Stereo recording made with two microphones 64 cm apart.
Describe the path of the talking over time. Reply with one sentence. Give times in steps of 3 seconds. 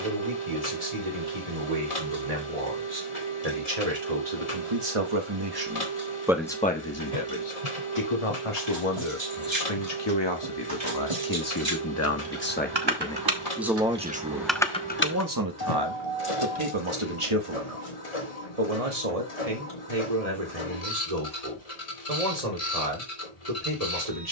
In this clip you hear the talking on the right from 0 s, on the left from 6 s, in the centre from 12 s and on the right from 15 s.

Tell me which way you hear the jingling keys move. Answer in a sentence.
You can hear the jingling keys go from the right side to the left.